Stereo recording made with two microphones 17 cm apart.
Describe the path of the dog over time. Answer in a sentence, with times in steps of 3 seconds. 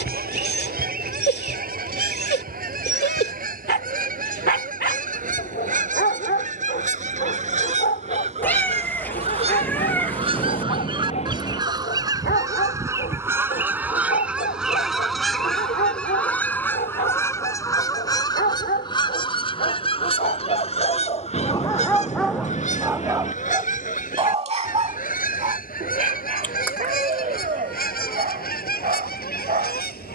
You can hear the dog on the left from 0 s, in the centre from 21 s and on the right from 24 s.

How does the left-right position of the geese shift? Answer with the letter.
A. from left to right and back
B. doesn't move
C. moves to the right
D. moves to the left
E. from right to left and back
D.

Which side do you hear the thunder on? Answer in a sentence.
In this clip you hear the thunder on the left.